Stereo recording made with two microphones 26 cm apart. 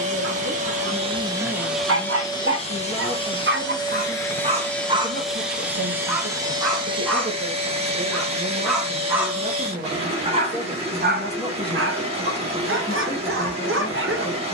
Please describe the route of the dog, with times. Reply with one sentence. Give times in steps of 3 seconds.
You can hear the dog on the right from 0 s, in the centre from 6 s and on the right from 9 s.